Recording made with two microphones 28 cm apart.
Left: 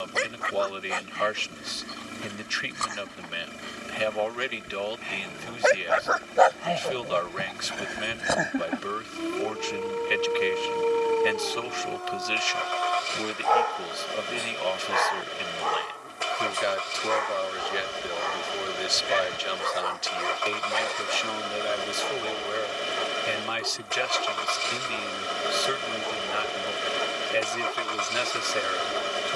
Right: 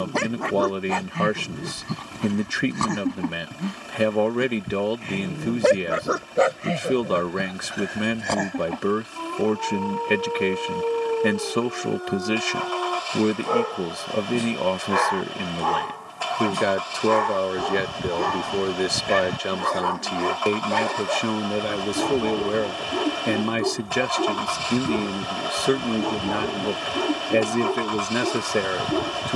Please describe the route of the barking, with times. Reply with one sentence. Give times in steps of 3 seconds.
You can hear the barking on the right from 0 s, in the centre from 6 s and on the right from 12 s.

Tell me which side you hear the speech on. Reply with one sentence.
You can hear the speech on the right.